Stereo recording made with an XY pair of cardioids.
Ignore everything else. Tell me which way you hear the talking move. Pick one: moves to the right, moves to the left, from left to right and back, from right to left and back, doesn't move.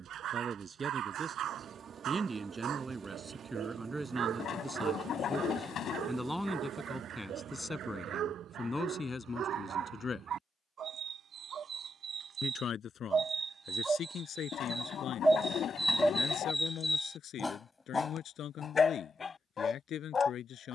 moves to the left.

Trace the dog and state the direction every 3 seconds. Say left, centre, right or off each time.
right, right, right, right, right, centre, left.